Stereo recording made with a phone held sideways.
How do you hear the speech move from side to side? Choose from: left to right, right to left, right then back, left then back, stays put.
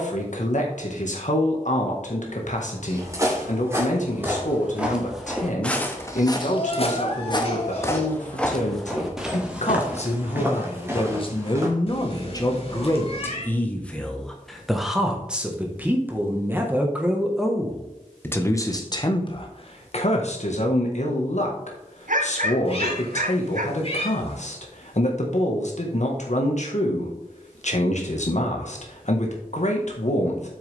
right then back.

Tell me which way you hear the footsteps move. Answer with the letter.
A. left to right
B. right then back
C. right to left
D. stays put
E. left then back
E.